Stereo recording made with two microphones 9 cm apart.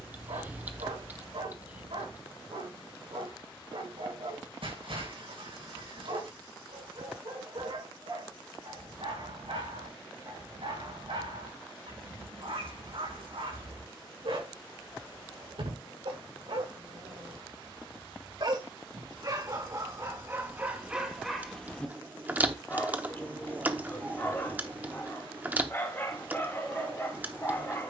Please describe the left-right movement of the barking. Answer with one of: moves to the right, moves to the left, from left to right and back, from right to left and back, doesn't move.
moves to the left.